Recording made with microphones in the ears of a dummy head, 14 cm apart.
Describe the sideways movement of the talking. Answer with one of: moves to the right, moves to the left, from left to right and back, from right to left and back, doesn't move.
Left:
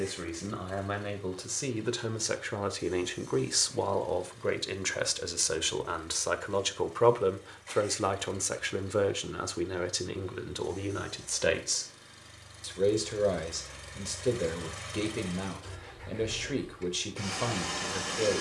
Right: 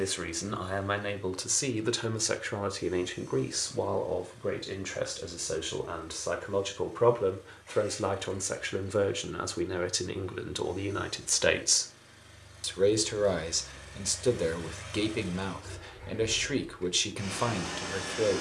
from right to left and back.